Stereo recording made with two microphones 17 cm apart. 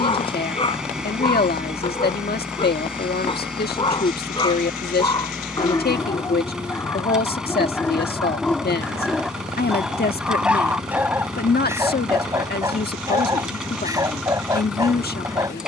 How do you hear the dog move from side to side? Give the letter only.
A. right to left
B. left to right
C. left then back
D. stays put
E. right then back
B.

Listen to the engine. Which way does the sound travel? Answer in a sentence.
You can hear the engine stay put.